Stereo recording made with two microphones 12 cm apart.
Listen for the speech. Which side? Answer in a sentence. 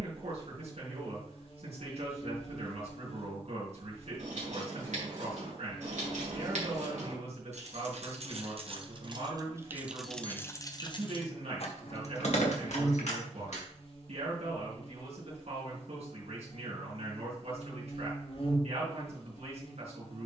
You can hear the speech on the right.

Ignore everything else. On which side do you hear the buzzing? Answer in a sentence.
You can hear the buzzing on the left.